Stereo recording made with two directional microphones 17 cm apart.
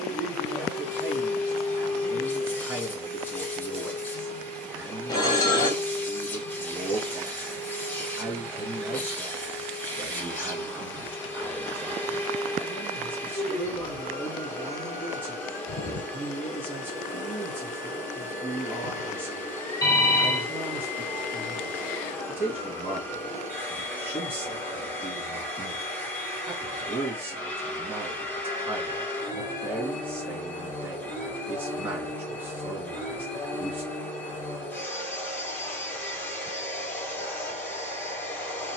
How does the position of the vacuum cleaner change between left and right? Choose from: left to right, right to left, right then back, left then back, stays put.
stays put.